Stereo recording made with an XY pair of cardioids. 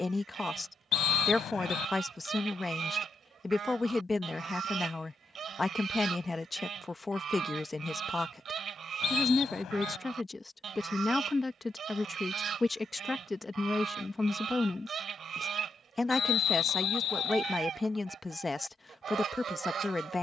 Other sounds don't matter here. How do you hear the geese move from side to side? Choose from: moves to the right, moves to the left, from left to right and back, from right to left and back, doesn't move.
doesn't move.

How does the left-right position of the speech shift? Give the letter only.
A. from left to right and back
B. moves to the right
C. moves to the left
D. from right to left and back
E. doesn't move
E.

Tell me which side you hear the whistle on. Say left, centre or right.
left.